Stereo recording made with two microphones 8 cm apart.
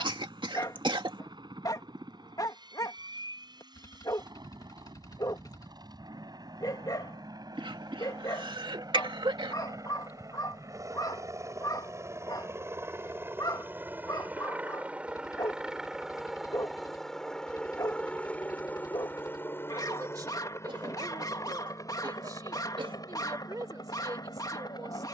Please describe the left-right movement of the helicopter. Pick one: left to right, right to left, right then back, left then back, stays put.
right to left.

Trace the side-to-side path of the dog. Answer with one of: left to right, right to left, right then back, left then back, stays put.
stays put.